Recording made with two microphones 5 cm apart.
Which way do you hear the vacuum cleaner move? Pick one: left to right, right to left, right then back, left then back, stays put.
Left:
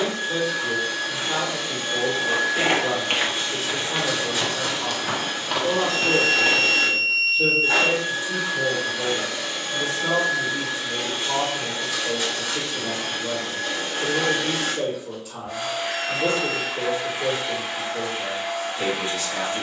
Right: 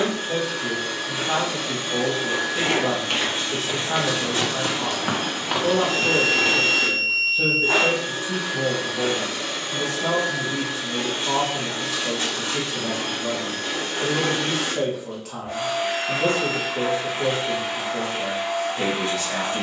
stays put.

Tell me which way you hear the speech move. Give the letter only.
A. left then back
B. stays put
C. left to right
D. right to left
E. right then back
B.